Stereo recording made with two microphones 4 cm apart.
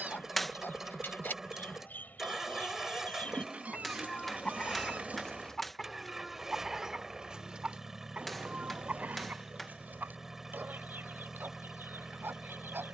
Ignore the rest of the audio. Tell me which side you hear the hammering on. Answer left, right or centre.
centre.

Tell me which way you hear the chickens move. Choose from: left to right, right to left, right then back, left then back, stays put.
left to right.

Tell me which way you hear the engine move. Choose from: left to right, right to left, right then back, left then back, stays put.
stays put.